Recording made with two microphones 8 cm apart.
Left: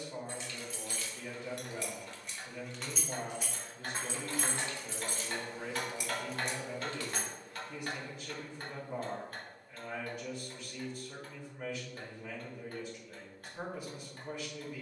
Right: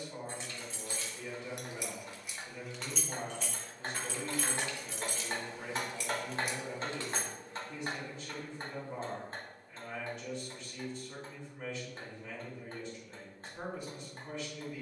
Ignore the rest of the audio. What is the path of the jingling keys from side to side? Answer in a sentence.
In this clip you hear the jingling keys go left and come back.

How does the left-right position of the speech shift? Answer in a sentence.
In this clip you hear the speech stay put.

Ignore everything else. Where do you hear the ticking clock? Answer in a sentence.
You can hear the ticking clock on the right.